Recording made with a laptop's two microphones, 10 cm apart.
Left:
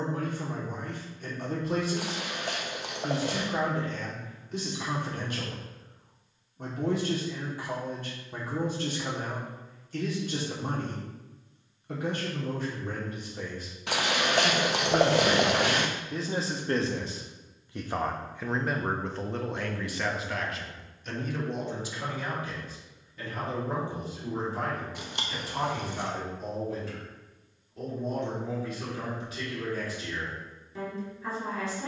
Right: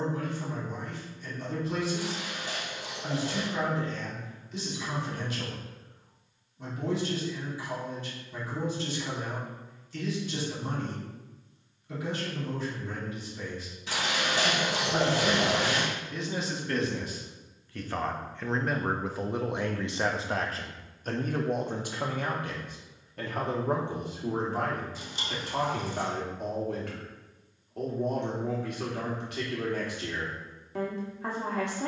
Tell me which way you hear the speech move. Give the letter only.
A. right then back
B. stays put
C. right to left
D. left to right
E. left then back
D.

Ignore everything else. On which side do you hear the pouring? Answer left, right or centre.
left.